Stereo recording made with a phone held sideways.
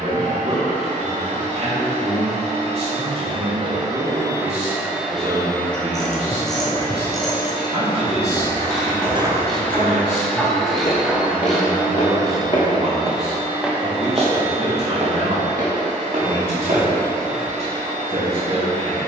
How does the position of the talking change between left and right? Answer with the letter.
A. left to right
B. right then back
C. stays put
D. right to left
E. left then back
C.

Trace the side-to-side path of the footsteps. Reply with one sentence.
You can hear the footsteps go left and come back.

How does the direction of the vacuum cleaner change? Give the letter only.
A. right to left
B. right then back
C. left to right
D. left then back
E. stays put
D.